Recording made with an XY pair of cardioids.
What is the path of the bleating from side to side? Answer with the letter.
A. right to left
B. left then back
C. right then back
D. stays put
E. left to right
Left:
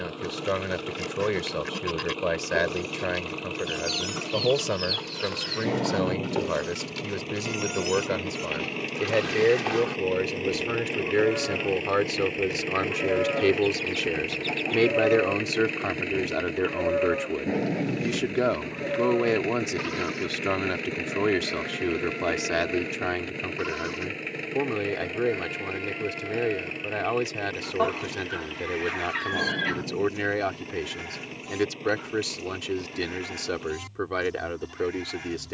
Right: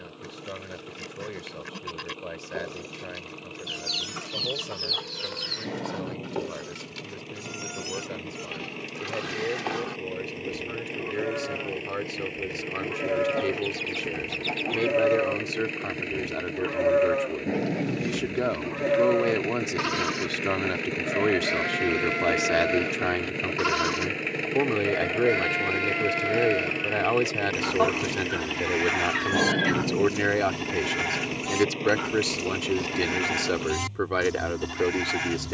E.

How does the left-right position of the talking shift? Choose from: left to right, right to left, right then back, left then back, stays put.
left to right.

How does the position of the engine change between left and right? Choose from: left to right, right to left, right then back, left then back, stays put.
left to right.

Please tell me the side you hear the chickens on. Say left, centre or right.
centre.